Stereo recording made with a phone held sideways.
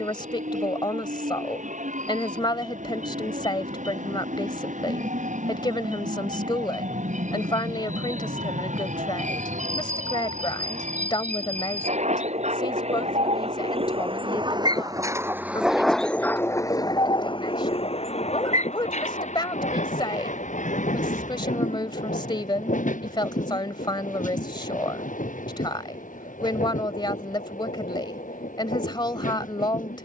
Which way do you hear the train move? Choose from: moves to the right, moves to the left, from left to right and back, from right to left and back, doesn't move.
moves to the left.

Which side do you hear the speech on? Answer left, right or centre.
left.